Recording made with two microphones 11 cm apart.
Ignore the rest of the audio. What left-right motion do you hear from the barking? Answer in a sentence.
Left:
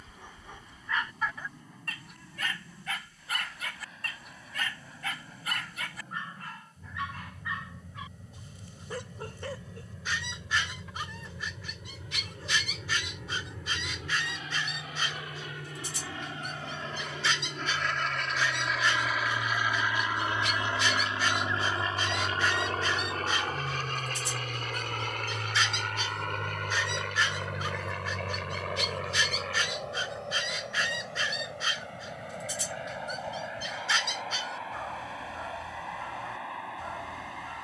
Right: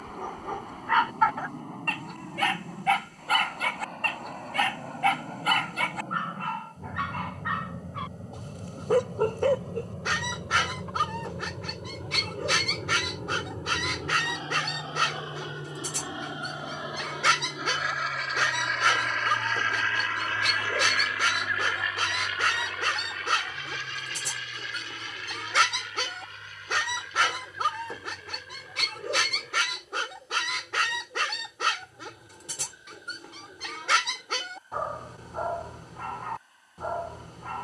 You can hear the barking stay in one place.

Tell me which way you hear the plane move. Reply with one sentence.
In this clip you hear the plane move to the left.